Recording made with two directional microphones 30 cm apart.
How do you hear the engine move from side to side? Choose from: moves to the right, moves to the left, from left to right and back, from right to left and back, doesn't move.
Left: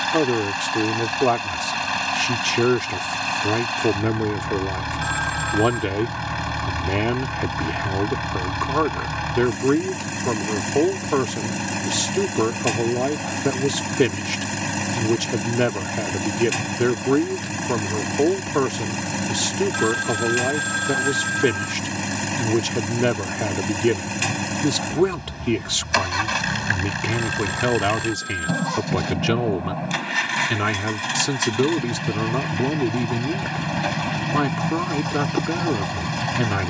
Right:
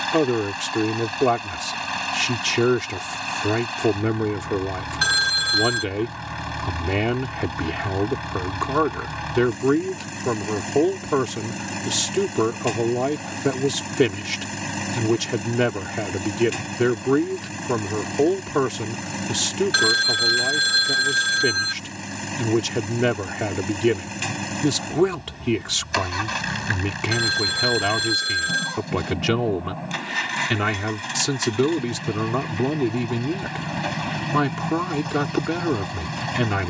doesn't move.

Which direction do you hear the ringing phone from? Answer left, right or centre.
right.